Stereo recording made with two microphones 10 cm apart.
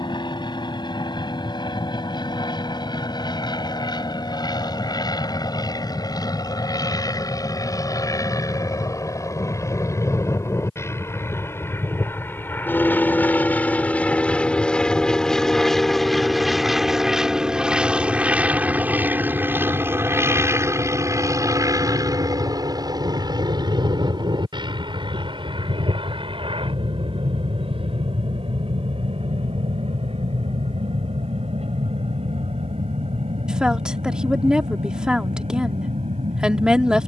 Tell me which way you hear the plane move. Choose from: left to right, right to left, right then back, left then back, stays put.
left to right.